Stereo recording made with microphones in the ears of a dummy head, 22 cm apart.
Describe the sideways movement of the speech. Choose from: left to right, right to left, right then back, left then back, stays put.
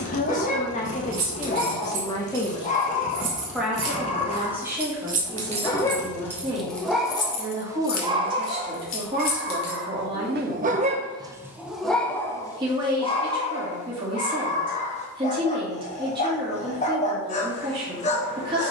left to right.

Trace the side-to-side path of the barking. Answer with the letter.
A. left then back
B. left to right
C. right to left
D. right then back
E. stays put
D.